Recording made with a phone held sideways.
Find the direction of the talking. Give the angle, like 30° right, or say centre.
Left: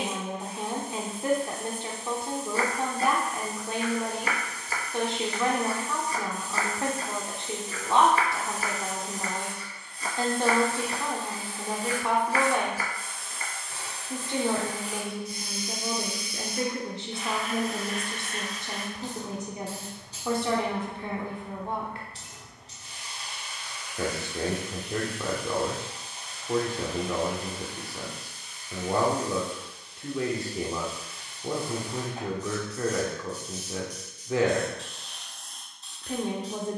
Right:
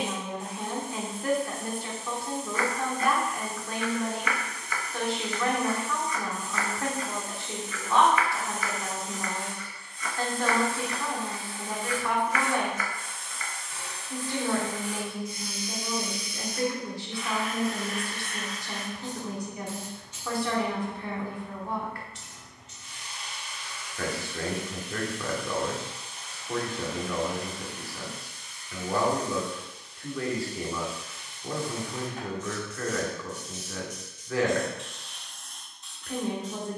20° left.